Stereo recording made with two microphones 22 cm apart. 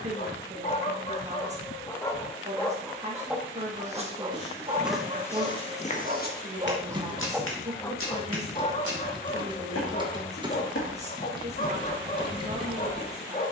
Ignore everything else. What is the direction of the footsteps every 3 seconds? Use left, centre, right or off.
off, centre, left, left, centre.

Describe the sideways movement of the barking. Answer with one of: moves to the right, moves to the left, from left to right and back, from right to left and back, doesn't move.
from left to right and back.